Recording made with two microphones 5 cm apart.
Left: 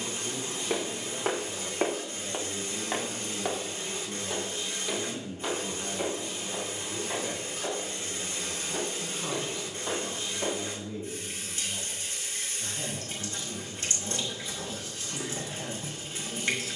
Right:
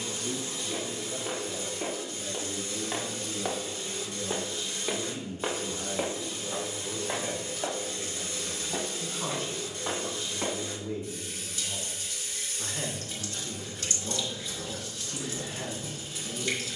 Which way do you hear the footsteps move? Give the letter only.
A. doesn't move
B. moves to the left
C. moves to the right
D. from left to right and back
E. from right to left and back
C.